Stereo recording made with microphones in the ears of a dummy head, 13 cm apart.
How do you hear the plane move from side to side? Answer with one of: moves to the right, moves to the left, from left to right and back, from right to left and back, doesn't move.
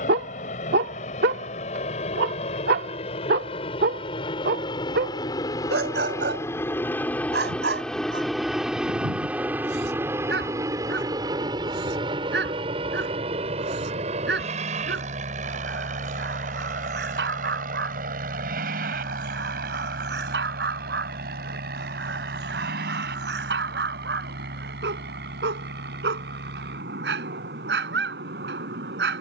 moves to the right.